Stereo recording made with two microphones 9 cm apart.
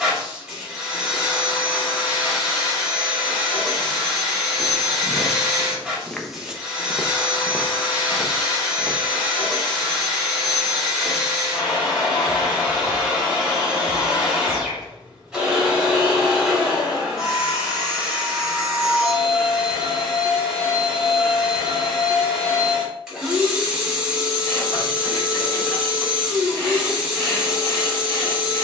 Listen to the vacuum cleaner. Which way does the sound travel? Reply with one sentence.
In this clip you hear the vacuum cleaner stay in one place.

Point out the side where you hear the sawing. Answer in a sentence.
In this clip you hear the sawing on the left.